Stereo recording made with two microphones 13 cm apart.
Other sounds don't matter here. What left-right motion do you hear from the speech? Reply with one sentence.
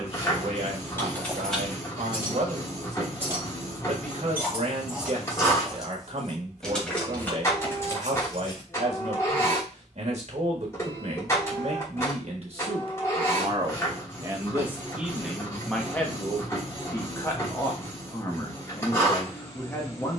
In this clip you hear the speech travel towards the left.